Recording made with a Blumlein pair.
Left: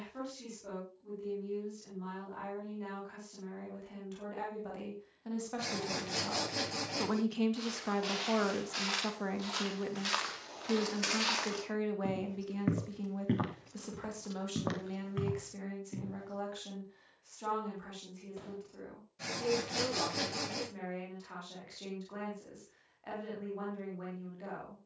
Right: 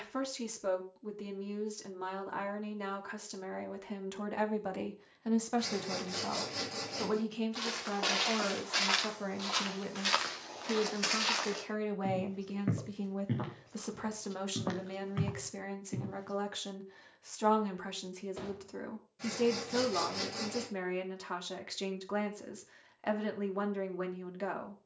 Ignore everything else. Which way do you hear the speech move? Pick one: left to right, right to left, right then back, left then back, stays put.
left then back.